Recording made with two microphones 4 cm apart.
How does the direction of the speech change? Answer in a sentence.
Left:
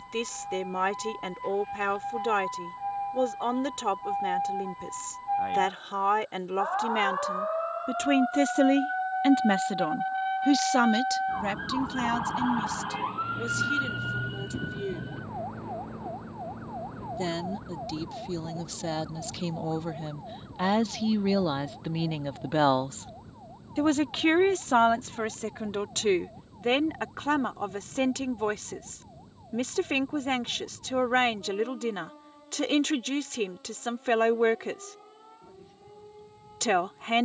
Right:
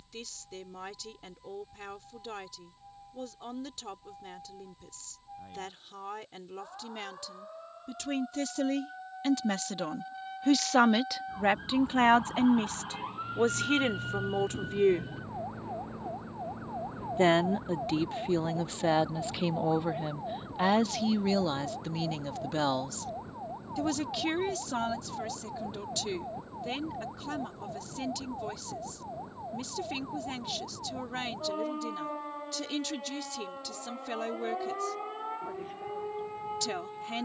In this clip you hear the speech move from left to right and back again.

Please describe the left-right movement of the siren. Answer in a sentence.
In this clip you hear the siren move to the right.